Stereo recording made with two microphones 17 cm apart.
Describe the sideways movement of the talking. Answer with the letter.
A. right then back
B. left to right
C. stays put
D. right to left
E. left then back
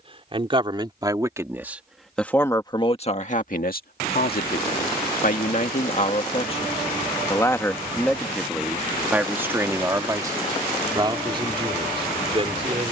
E.